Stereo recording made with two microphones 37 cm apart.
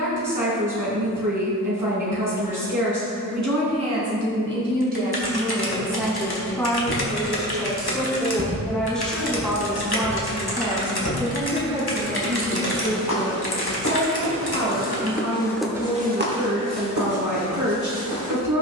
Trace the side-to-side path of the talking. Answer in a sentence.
You can hear the talking move from right to left and back again.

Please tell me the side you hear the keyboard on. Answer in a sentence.
You can hear the keyboard on the left.